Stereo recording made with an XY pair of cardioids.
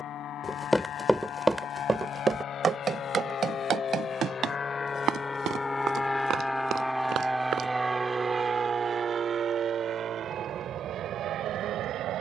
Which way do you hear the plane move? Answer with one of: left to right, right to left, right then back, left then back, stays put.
left to right.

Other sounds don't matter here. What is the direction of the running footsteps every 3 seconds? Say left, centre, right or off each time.
centre, right, right, off.